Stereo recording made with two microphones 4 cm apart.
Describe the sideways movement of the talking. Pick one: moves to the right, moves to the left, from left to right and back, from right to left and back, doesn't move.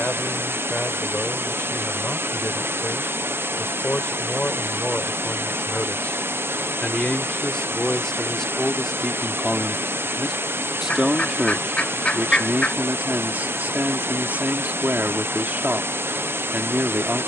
moves to the right.